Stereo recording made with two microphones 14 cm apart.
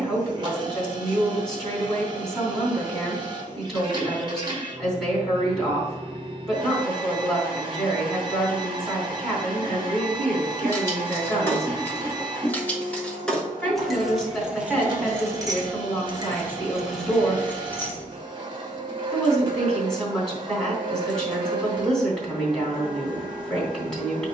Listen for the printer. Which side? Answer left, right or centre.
right.